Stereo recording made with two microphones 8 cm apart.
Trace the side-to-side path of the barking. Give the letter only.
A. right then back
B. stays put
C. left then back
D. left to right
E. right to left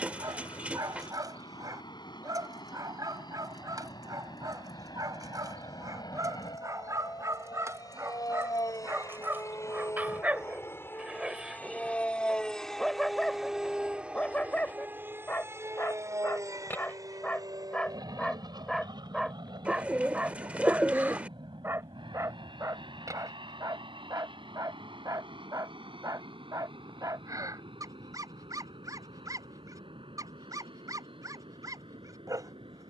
C.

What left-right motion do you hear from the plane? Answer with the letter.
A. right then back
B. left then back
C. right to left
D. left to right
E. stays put
D.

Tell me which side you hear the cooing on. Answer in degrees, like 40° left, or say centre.
20° right.